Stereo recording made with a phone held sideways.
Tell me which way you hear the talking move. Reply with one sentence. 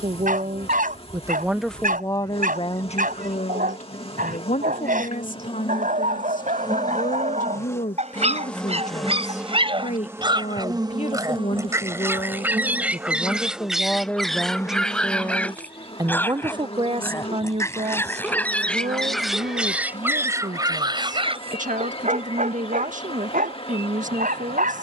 You can hear the talking go left and come back.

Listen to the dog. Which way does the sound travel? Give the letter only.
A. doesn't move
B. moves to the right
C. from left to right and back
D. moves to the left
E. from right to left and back
E.